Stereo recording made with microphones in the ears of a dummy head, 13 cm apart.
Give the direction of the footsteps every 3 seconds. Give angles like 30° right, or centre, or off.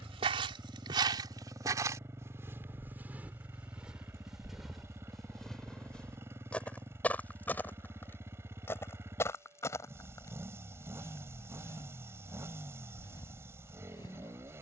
20° right, centre, 10° left, 20° left, 20° left.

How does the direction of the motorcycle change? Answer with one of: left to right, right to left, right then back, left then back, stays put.
stays put.